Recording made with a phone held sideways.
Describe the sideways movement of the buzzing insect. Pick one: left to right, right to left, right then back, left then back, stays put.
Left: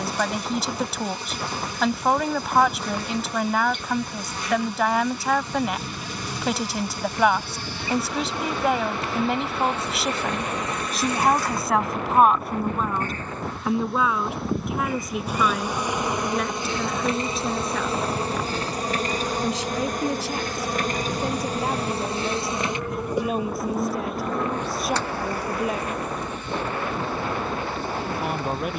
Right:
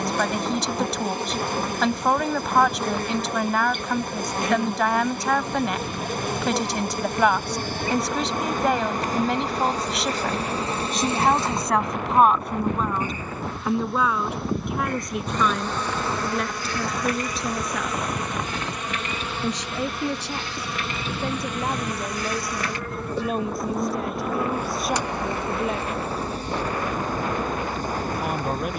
left then back.